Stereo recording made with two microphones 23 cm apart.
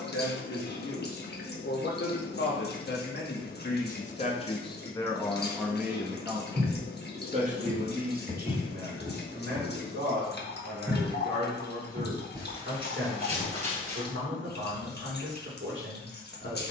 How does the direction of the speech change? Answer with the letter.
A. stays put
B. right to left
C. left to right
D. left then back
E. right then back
C.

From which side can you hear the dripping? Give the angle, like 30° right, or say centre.
50° left.